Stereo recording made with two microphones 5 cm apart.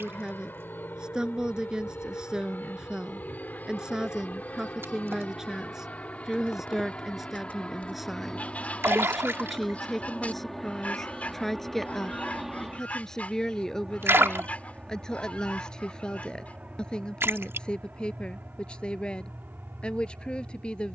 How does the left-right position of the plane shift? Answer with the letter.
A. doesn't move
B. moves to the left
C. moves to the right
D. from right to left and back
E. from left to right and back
C.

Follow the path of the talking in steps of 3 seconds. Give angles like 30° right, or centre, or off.
20° right, 10° right, 10° right, centre, 10° left, 20° left, 20° left.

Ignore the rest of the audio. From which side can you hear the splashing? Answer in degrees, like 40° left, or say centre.
60° right.